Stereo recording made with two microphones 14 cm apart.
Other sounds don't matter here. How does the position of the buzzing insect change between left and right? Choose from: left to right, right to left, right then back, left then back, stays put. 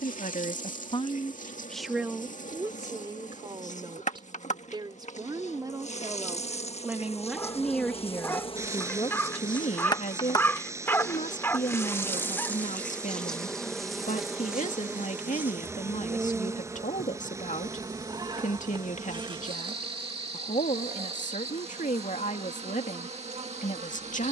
left to right.